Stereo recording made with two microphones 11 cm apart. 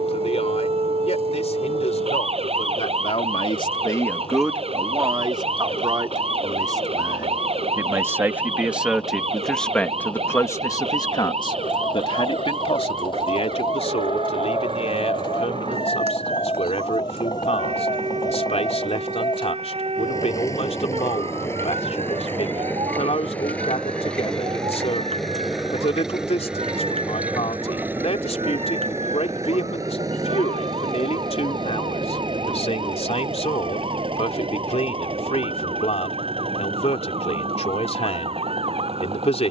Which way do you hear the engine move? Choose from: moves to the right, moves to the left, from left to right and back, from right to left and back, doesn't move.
moves to the right.